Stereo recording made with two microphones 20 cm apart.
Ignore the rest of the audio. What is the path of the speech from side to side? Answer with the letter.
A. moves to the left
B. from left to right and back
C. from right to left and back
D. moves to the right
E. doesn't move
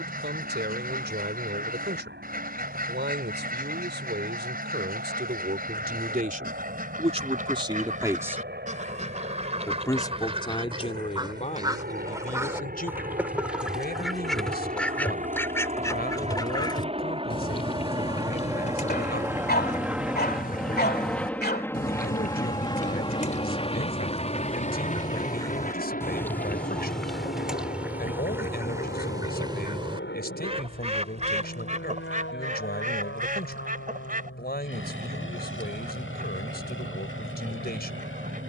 A.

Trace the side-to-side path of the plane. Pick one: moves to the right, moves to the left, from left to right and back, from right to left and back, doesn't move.
moves to the left.